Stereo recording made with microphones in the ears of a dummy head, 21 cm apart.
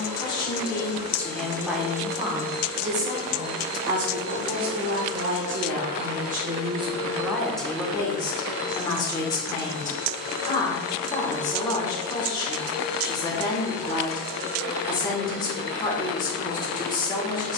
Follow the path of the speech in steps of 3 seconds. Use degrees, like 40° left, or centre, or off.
centre, 50° right, centre, 20° left, 20° left, 20° left.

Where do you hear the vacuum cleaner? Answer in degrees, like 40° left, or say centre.
80° right.